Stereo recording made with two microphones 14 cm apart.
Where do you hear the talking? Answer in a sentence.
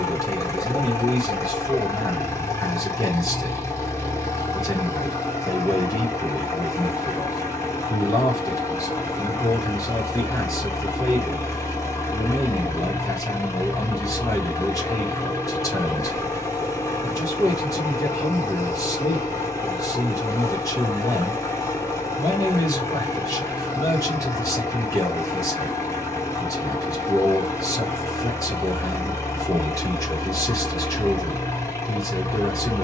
In this clip you hear the talking on the left.